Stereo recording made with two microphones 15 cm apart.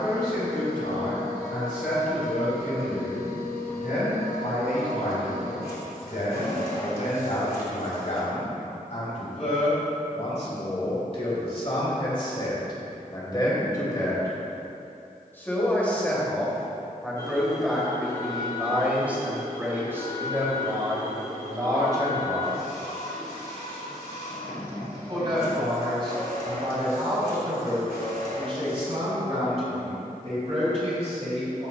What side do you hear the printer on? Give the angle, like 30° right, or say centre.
70° left.